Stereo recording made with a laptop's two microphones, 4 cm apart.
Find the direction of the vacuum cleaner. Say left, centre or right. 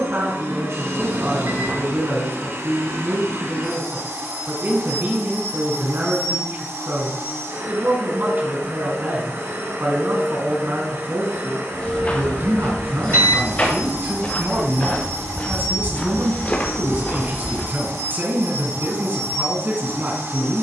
right.